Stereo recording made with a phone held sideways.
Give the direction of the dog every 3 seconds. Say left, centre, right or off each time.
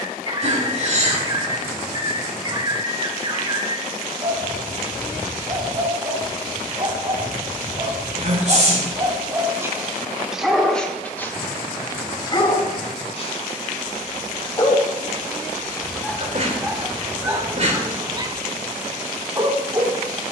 right, right, right, centre, left, centre, right.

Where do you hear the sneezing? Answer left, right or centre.
right.